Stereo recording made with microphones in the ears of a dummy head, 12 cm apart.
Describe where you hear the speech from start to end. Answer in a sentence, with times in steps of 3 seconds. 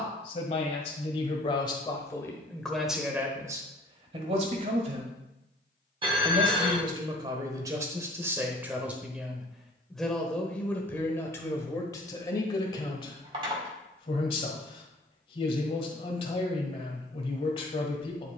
You can hear the speech on the left from 0 s, on the right from 3 s, in the centre from 9 s and on the left from 12 s.